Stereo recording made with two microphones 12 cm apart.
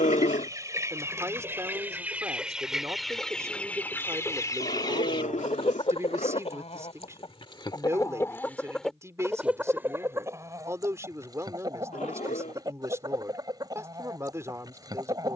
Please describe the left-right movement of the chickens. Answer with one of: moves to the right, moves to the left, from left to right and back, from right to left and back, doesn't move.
from right to left and back.